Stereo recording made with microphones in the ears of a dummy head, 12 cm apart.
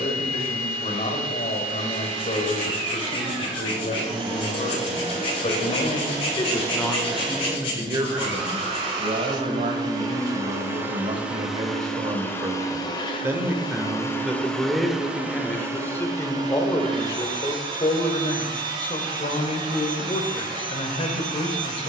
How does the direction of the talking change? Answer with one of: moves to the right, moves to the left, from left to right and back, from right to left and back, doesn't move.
from left to right and back.